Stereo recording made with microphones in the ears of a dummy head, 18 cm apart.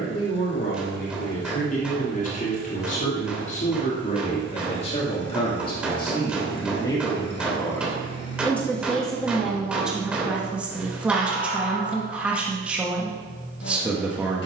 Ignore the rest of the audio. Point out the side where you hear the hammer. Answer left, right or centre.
centre.